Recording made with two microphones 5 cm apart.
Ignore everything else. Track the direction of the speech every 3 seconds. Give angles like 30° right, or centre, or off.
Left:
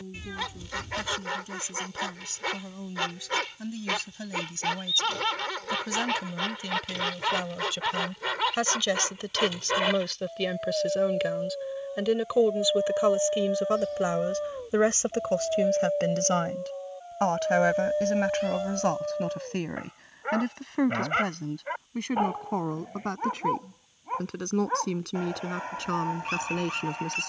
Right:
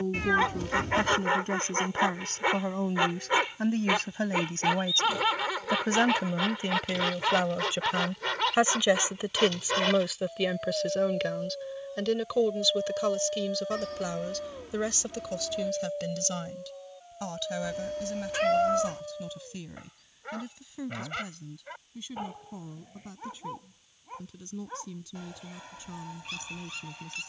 50° right, 40° right, 30° right, centre, 20° left, 50° left, 60° left, 70° left, 70° left.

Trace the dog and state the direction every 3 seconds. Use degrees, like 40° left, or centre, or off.
20° right, 10° right, centre, 10° left, 20° left, 30° left, 30° left, 40° left, 40° left.